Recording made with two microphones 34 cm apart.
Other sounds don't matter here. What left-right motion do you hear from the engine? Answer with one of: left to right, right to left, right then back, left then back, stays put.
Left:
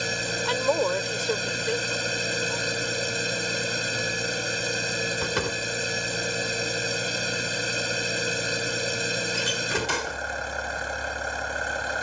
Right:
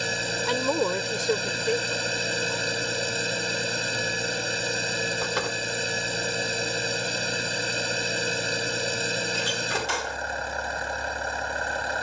stays put.